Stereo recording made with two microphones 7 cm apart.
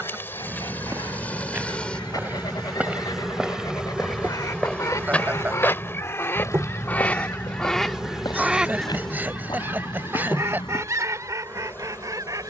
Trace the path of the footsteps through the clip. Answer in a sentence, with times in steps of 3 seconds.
In this clip you hear the footsteps on the right from 0 s, in the centre from 3 s and on the left from 6 s.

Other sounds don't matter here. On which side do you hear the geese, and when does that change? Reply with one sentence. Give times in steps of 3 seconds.
You can hear the geese on the left from 0 s, in the centre from 6 s and on the right from 9 s.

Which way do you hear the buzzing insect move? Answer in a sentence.
You can hear the buzzing insect move from left to right and back again.